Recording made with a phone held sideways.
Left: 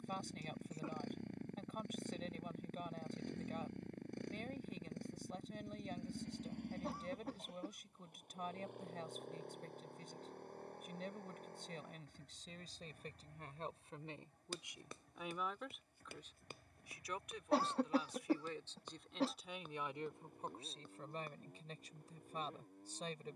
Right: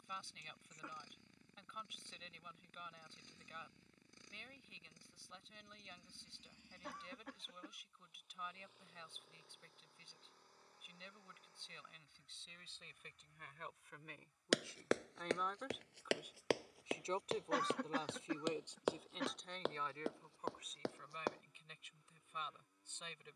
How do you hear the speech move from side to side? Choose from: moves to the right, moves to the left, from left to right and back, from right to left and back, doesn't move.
from left to right and back.